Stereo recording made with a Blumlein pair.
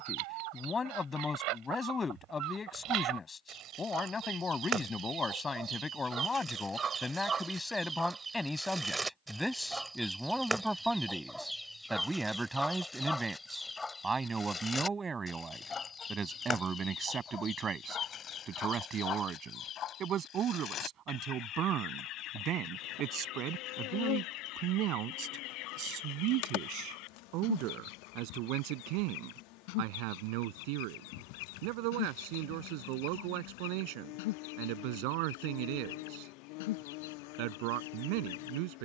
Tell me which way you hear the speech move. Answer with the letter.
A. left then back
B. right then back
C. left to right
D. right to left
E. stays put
C.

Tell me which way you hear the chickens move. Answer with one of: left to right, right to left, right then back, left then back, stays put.
right to left.